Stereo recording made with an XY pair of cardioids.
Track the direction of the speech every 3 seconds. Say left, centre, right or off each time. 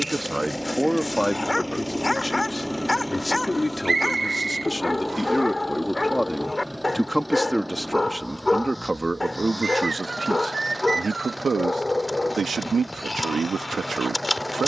centre, centre, centre, right, right.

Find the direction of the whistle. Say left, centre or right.
right.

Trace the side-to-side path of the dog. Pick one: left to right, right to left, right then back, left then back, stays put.
stays put.